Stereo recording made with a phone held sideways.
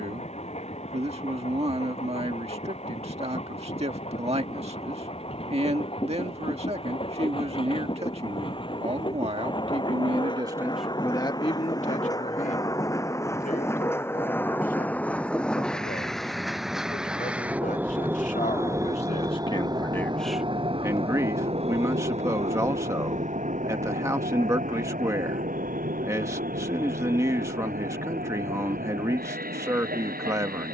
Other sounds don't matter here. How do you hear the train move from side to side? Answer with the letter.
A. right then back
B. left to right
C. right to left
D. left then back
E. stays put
B.